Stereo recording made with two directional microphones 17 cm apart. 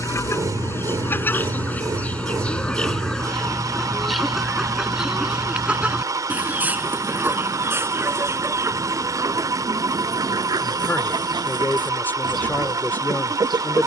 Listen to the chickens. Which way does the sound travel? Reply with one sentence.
You can hear the chickens travel towards the right.